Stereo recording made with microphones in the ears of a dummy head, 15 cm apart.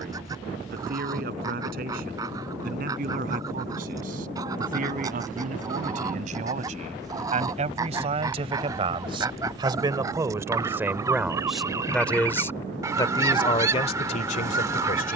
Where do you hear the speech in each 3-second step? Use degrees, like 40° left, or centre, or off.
60° right, 50° right, 40° right, 10° right, 30° left.